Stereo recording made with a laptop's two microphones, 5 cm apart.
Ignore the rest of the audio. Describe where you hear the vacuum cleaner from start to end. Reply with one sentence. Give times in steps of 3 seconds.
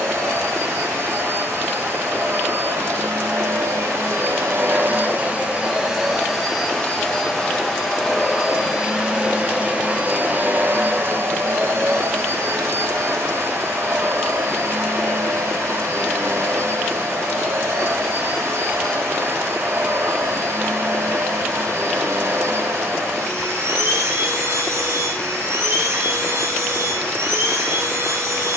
You can hear the vacuum cleaner on the right from 0 s, in the centre from 6 s and on the right from 9 s.